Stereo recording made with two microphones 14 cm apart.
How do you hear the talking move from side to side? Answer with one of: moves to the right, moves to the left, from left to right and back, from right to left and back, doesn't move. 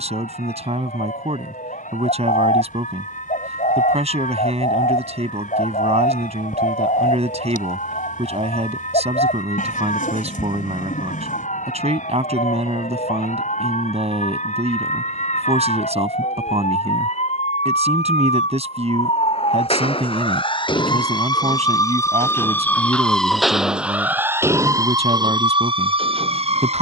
doesn't move.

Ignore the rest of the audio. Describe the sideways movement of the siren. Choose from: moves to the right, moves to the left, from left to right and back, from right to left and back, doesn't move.
moves to the right.